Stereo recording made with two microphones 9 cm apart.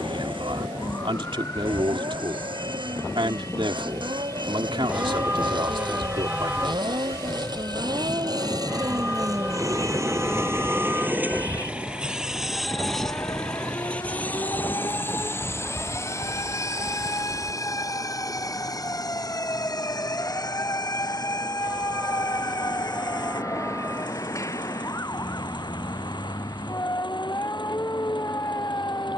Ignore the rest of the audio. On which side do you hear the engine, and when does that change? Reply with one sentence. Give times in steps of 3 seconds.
You can hear the engine on the right from 0 s, in the centre from 12 s and on the left from 15 s.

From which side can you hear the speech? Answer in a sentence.
In this clip you hear the speech on the right.